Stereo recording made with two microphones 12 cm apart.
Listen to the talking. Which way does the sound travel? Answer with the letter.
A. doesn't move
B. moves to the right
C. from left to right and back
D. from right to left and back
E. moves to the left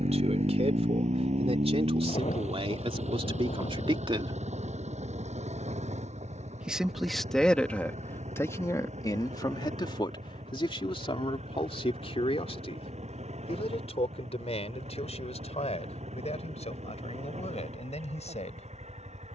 E.